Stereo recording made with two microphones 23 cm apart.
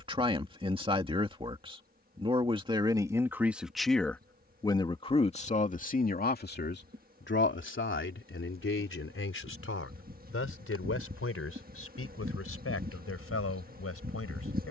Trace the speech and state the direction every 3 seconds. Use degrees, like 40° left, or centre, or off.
20° right, 10° left, 50° left, 70° left, 80° left.